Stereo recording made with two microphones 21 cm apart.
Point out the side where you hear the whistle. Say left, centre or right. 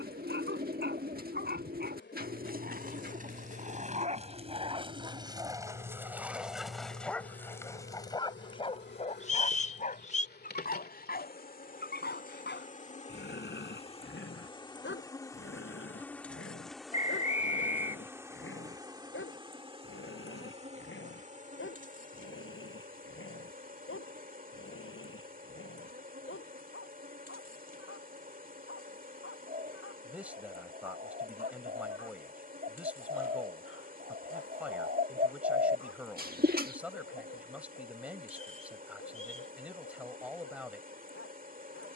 left.